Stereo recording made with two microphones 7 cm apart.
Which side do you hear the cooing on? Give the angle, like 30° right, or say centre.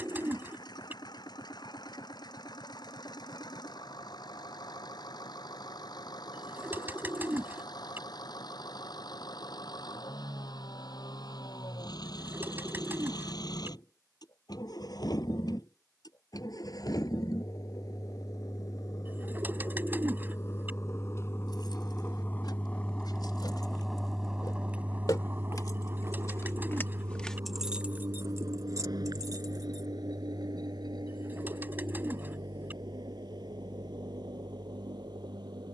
30° right.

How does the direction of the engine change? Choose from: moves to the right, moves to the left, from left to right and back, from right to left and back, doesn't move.
moves to the right.